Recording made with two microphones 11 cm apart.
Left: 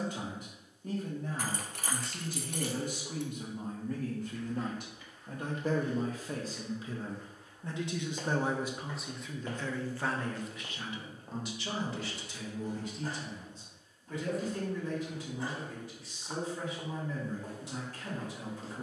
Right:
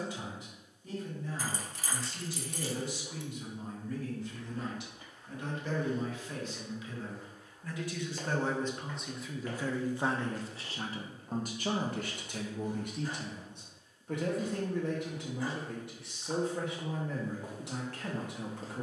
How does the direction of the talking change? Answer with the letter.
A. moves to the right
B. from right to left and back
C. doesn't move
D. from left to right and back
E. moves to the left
A.